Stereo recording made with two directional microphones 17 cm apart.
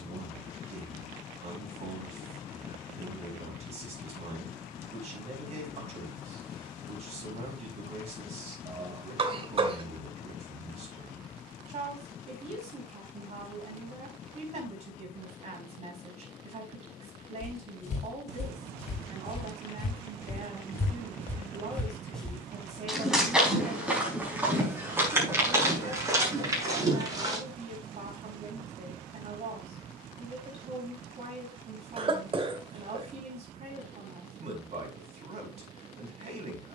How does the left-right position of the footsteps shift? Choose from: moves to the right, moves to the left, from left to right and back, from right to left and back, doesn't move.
moves to the right.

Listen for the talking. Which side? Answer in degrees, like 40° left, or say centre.
40° right.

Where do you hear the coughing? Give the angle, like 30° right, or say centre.
30° right.